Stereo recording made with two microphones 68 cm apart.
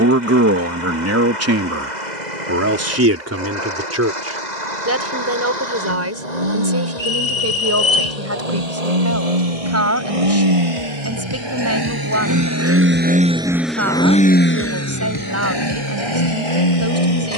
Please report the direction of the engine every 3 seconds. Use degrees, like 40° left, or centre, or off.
70° right, 70° right, 60° right, 40° right, centre, 40° left.